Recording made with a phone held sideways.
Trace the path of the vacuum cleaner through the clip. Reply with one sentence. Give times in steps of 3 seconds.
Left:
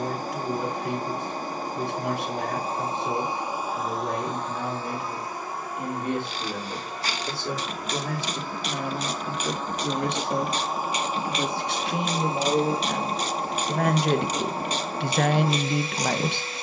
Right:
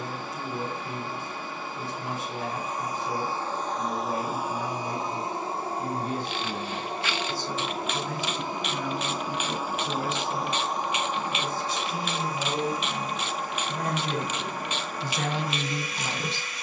In this clip you hear the vacuum cleaner on the left from 0 s, in the centre from 3 s, on the right from 6 s, in the centre from 9 s and on the left from 12 s.